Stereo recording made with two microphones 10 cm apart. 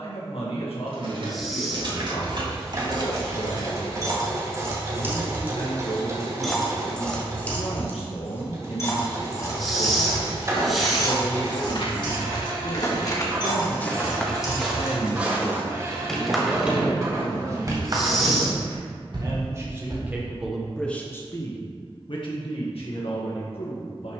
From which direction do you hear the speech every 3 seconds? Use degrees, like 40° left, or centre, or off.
70° left, 70° left, 70° left, 70° left, 70° left, centre, 20° right, 60° left.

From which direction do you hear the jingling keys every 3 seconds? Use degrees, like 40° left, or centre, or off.
50° right, 30° right, 20° left, 40° left, 40° left, 10° right, 50° right, off.